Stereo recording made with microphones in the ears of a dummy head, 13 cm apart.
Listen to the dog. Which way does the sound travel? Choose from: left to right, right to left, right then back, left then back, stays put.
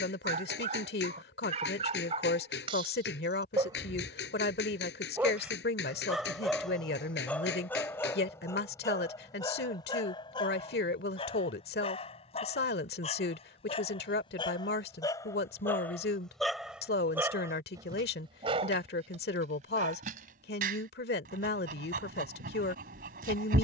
left then back.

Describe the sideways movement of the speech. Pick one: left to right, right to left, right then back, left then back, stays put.
stays put.